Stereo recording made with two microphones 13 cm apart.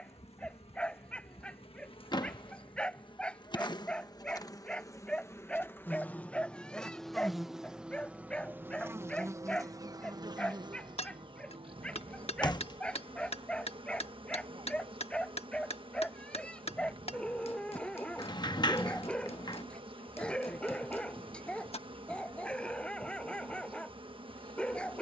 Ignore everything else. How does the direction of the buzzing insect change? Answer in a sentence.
You can hear the buzzing insect move to the right.